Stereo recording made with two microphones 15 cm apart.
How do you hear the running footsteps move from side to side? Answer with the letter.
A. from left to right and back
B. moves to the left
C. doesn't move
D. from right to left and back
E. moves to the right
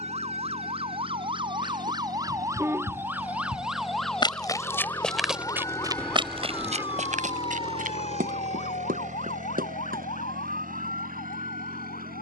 E.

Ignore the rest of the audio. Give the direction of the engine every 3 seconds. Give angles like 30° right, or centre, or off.
60° left, 40° left, 30° right, 70° right.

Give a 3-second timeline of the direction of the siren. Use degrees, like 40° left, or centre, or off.
30° right, 10° left, 40° left, 60° left.